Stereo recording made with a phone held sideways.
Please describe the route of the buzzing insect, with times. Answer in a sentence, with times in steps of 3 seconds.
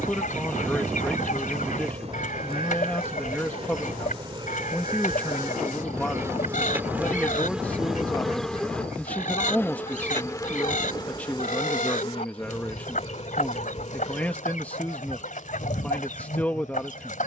In this clip you hear the buzzing insect on the right from 0 s, in the centre from 6 s and on the left from 9 s.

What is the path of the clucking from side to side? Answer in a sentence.
In this clip you hear the clucking stay put.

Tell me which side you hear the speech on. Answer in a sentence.
In this clip you hear the speech in the centre.